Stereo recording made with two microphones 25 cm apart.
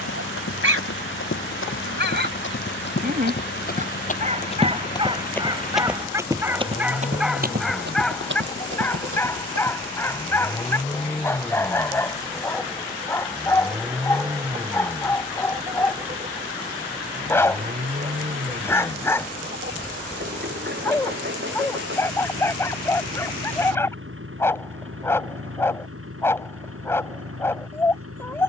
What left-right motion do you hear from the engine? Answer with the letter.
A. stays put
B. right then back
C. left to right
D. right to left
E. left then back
C.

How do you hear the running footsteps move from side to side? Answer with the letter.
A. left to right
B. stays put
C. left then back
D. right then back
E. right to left
A.